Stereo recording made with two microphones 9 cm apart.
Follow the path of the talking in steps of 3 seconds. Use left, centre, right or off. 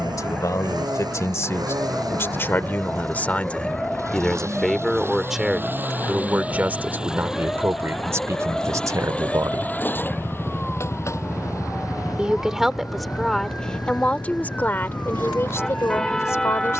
left, centre, right, right, centre, left.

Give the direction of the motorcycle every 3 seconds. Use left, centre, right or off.
right, right, centre, left, left, left.